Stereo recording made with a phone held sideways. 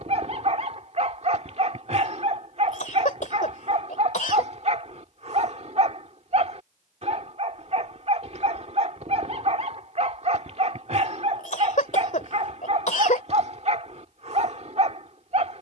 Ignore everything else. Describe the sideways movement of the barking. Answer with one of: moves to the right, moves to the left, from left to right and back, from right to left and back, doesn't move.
doesn't move.